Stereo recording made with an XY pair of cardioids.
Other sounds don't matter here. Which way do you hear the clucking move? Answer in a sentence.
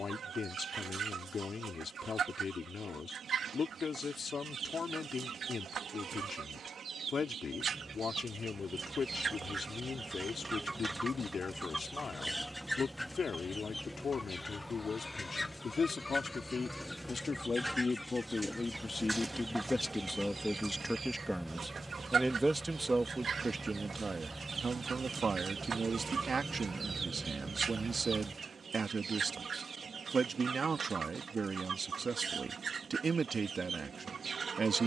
In this clip you hear the clucking go left and come back.